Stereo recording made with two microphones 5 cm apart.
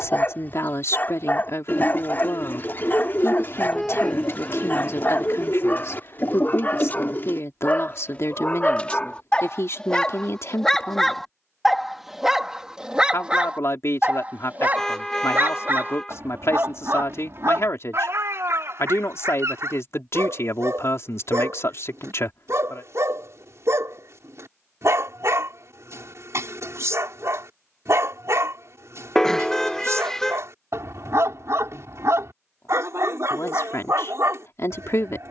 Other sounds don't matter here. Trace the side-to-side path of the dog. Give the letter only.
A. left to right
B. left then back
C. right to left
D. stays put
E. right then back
A.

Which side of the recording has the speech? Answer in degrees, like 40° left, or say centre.
60° left.